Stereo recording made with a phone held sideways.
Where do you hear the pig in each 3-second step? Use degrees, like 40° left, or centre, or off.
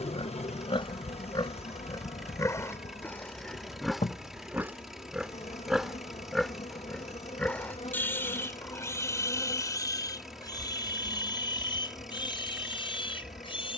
30° left, centre, 10° left, 30° left, 40° left.